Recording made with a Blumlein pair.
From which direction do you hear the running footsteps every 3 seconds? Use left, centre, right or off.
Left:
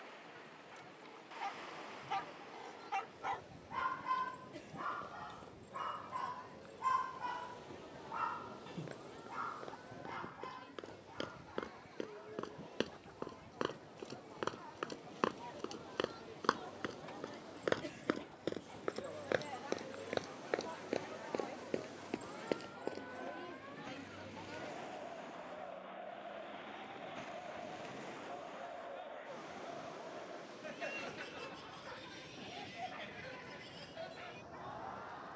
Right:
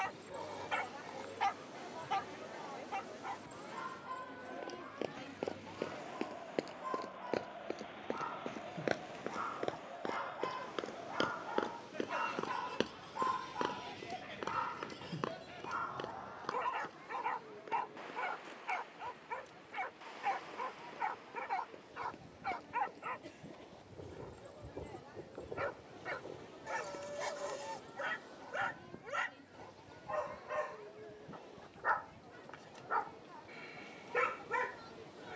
off, right, right, right, centre, left, left, left, off, off, off, off.